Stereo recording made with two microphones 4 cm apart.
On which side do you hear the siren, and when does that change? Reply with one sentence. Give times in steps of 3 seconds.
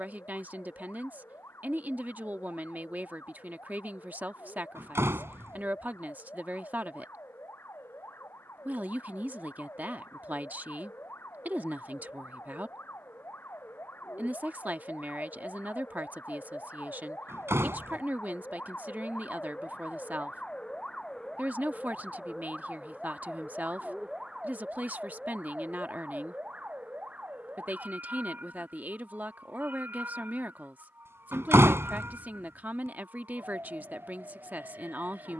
In this clip you hear the siren on the left from 0 s, in the centre from 21 s and on the right from 24 s.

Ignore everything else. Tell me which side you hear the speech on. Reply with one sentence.
In this clip you hear the speech on the right.